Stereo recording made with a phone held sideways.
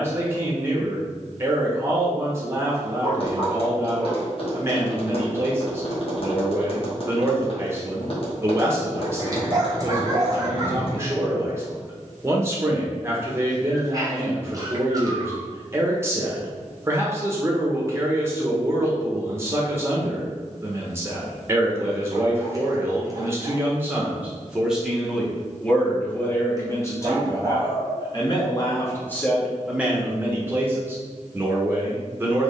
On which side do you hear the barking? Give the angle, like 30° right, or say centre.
30° right.